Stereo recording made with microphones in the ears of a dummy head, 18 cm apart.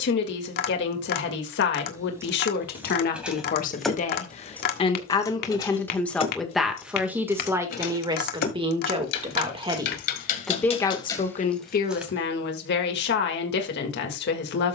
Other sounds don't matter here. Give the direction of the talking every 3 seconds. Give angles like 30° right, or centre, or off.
60° left, 30° left, 10° right, 10° left, 50° left.